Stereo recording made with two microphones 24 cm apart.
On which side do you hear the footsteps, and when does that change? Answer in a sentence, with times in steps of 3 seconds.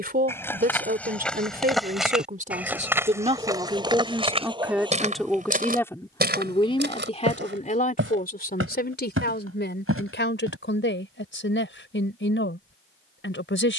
You can hear the footsteps in the centre from 0 s, on the right from 3 s and not at all from 12 s.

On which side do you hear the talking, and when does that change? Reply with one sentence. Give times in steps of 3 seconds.
You can hear the talking on the right from 0 s, in the centre from 3 s and on the left from 6 s.